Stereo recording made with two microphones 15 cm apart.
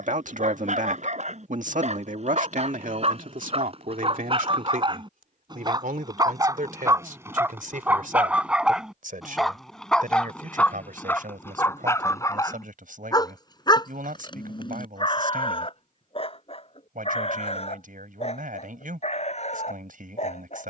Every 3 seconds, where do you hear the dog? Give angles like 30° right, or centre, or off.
50° right, 40° right, 20° right, 10° left, 30° left, 40° left, 50° left.